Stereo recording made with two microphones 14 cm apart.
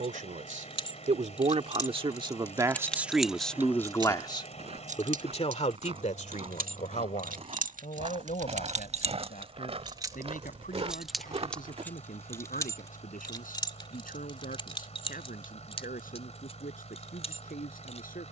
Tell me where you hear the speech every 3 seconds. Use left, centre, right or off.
right, left, left, left, left, left.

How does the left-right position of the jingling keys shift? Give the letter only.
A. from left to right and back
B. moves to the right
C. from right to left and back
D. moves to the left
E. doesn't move
A.